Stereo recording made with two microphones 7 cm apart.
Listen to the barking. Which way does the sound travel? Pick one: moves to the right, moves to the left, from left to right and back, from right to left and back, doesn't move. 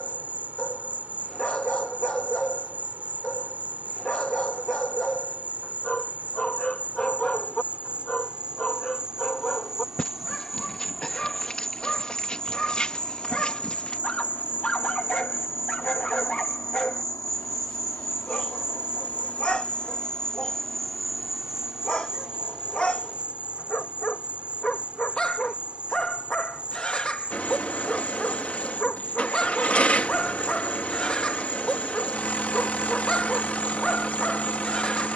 doesn't move.